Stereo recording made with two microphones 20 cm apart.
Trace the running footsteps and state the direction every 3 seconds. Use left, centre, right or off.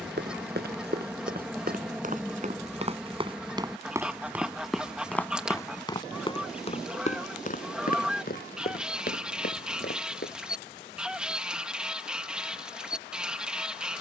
right, centre, left, left, off.